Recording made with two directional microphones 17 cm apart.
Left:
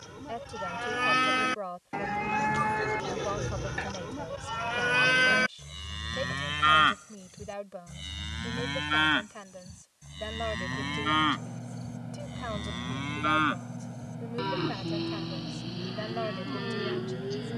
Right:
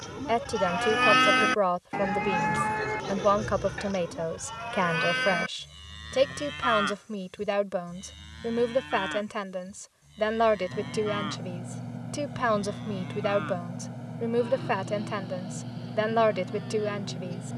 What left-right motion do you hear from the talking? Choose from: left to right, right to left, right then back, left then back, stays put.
stays put.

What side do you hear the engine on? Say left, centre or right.
centre.